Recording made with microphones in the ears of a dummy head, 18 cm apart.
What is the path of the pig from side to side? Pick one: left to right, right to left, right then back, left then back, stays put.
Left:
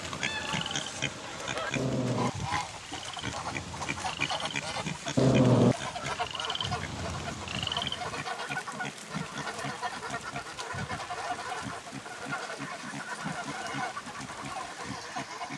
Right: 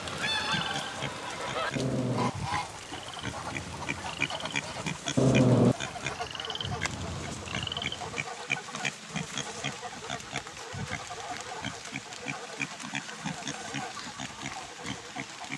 left to right.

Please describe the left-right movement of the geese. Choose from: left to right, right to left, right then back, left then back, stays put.
right to left.